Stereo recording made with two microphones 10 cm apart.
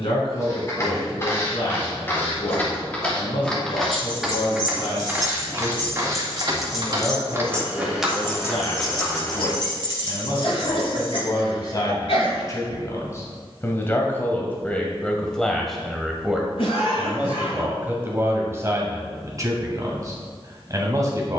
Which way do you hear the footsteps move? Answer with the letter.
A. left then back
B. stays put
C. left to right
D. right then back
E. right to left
D.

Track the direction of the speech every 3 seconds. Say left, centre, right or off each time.
left, left, left, left, left, centre, right.